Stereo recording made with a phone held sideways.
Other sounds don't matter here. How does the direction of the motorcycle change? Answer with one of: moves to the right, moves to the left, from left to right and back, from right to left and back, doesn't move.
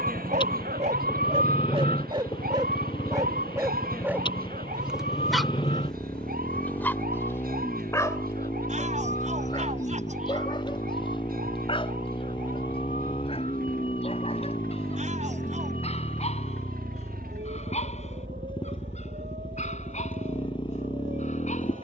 doesn't move.